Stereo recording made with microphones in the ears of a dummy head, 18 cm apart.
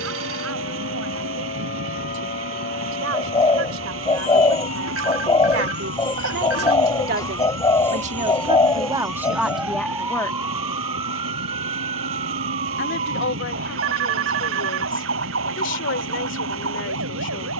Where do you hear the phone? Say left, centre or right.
right.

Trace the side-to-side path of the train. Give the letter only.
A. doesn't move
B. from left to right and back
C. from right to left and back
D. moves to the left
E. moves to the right
A.